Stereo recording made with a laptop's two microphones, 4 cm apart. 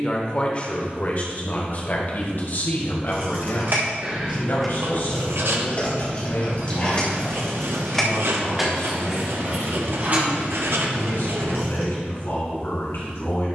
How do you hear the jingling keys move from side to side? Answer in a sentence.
You can hear the jingling keys move from right to left and back again.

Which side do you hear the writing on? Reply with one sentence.
In this clip you hear the writing on the right.